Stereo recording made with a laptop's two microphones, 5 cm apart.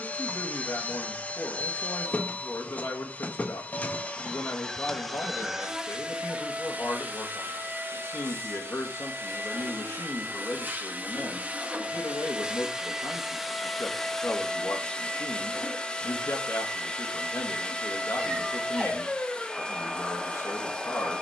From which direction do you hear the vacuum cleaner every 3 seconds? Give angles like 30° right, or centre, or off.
30° left, 10° left, 40° right, 40° right, centre, 20° left, 20° left.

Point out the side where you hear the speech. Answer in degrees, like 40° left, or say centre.
60° left.